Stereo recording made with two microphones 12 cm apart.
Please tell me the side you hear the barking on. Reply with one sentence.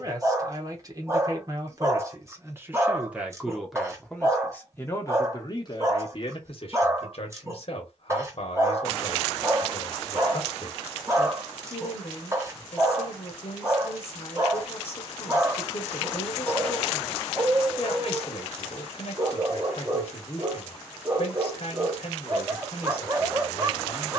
You can hear the barking on the right.